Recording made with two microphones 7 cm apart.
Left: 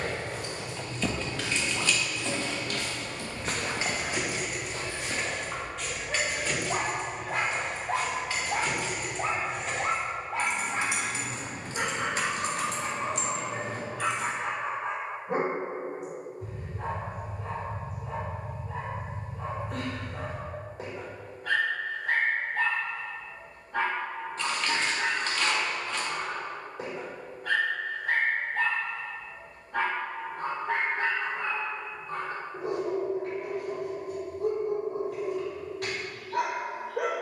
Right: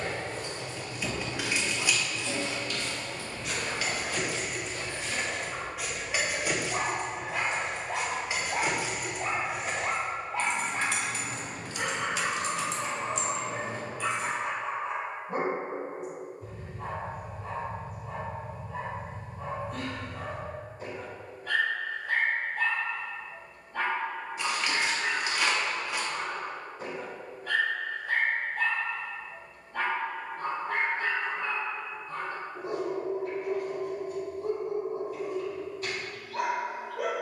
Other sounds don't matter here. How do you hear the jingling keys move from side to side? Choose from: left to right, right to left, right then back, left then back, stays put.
right then back.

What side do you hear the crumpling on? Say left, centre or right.
centre.